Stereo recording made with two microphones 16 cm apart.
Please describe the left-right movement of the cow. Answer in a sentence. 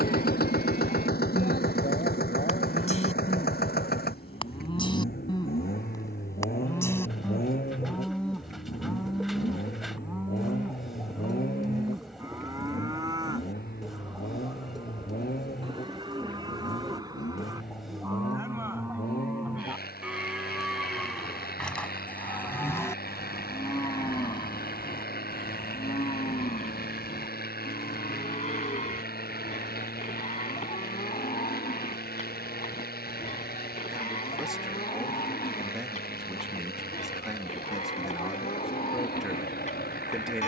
In this clip you hear the cow go right and come back.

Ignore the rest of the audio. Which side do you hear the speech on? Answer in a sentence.
In this clip you hear the speech in the centre.